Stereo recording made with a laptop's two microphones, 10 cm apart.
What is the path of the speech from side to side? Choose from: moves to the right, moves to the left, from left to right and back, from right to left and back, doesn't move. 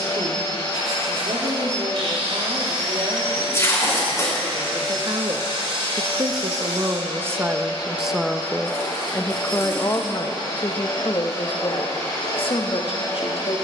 moves to the left.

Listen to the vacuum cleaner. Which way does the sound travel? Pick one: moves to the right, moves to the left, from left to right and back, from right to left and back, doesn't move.
doesn't move.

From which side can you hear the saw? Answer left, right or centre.
right.